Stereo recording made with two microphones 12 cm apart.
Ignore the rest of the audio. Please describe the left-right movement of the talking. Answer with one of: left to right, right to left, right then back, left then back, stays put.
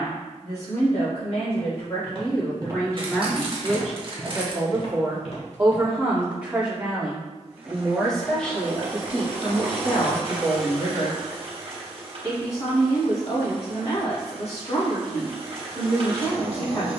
right then back.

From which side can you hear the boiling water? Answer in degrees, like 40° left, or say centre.
50° right.